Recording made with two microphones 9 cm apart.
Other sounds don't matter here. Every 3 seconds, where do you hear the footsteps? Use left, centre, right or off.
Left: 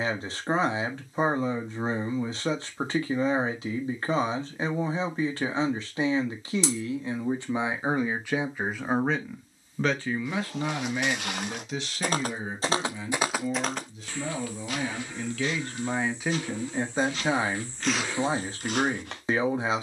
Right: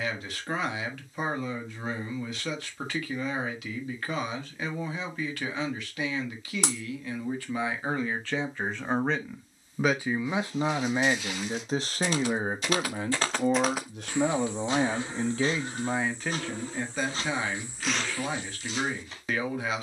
off, off, off, left, centre, right, left.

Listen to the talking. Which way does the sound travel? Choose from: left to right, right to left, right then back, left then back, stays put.
right then back.